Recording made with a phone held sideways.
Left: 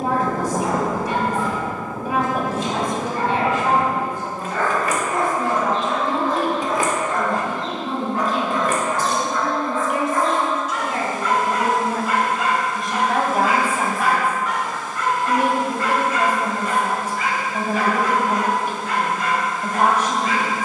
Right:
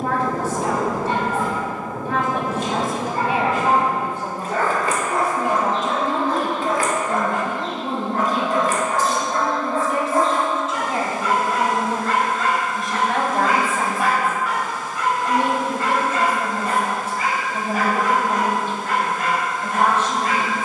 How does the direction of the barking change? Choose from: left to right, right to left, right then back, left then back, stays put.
left then back.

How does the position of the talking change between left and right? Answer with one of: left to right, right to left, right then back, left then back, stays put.
right then back.